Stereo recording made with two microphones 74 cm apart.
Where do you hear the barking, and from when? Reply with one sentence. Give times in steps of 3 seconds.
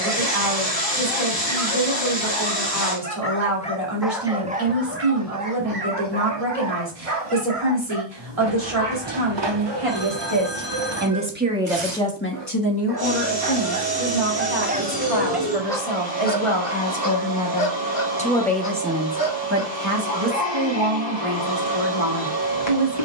In this clip you hear the barking on the left from 0 s, in the centre from 3 s, on the right from 6 s and on the left from 15 s.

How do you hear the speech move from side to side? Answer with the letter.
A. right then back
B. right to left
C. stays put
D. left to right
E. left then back
E.